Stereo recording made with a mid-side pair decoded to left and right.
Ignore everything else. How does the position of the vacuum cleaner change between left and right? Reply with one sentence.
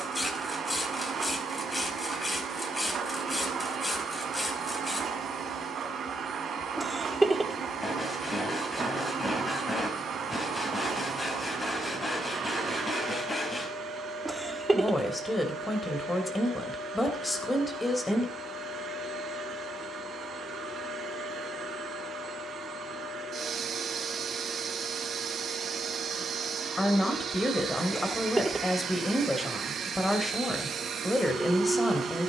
In this clip you hear the vacuum cleaner stay in one place.